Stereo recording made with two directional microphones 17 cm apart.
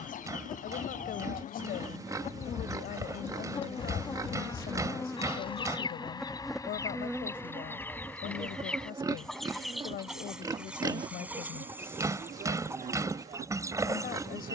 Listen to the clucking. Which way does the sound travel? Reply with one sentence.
In this clip you hear the clucking move from left to right.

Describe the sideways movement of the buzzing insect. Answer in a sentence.
You can hear the buzzing insect move from left to right.